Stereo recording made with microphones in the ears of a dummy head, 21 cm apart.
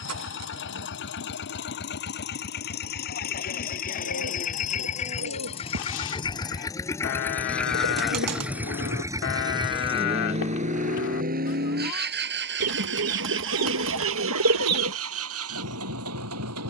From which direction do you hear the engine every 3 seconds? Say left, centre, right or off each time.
left, left, centre, right, right, right.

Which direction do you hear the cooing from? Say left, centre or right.
right.